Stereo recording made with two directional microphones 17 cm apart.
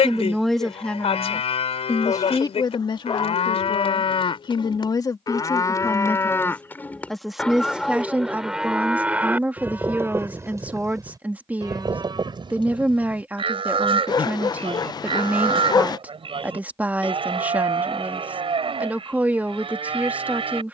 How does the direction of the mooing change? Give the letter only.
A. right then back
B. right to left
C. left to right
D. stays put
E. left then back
C.